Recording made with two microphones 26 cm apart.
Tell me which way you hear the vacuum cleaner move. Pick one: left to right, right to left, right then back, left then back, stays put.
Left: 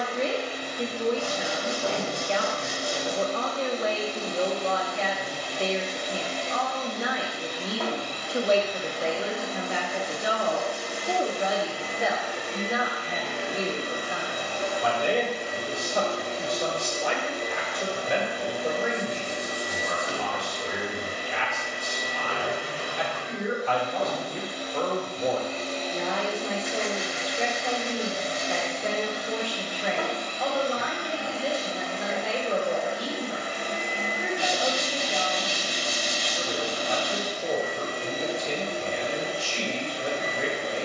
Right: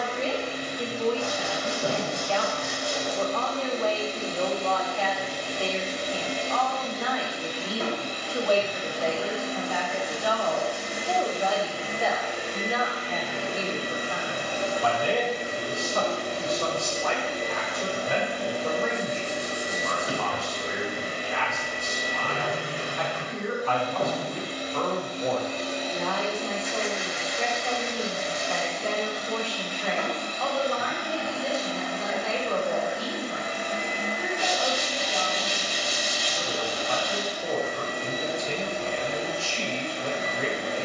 right to left.